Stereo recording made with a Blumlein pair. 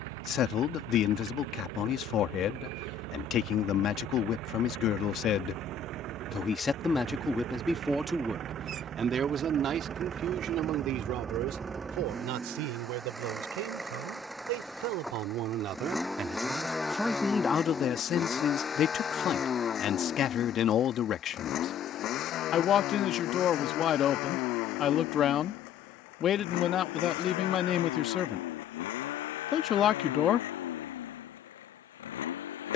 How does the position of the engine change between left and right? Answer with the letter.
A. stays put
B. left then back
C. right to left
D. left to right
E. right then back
C.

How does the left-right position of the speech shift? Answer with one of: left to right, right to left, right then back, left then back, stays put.
right then back.